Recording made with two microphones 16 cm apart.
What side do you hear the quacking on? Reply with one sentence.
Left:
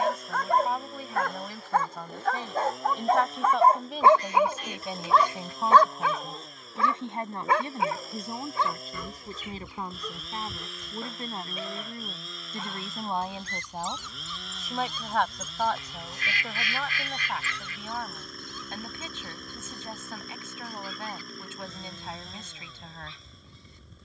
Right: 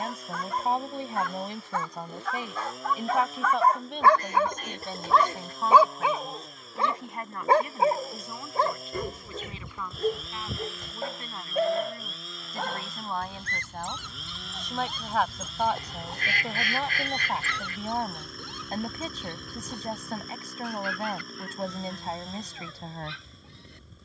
In this clip you hear the quacking on the right.